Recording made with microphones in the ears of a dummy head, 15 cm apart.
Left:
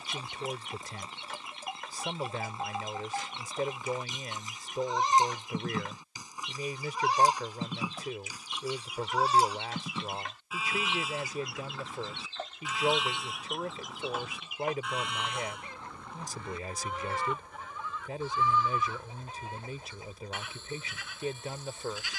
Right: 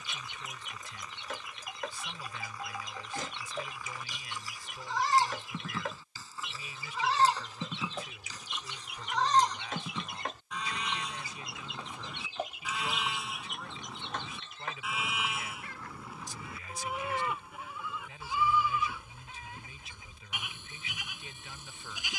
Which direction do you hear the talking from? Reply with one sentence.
You can hear the talking on the left.